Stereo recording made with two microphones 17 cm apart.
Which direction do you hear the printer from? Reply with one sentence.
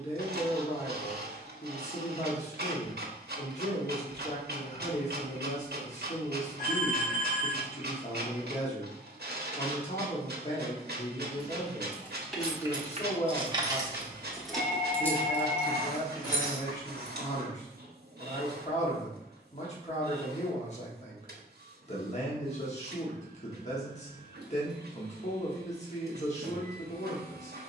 In this clip you hear the printer on the right.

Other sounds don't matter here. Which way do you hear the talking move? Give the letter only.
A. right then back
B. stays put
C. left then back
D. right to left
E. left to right
B.